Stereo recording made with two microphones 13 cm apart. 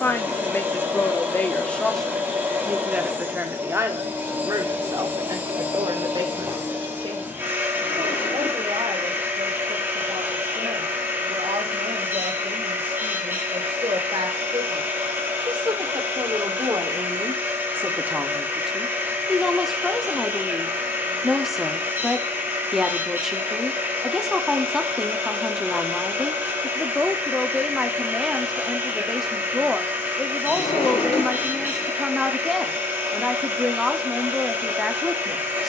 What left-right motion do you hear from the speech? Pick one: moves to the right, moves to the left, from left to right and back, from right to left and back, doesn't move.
from left to right and back.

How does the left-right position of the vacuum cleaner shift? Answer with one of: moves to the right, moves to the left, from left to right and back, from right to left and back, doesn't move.
doesn't move.